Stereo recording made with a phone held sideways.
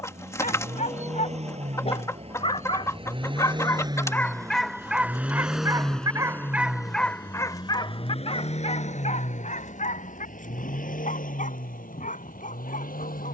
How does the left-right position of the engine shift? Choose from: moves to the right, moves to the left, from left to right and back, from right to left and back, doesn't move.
moves to the left.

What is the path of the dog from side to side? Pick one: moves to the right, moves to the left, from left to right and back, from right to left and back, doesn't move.
from left to right and back.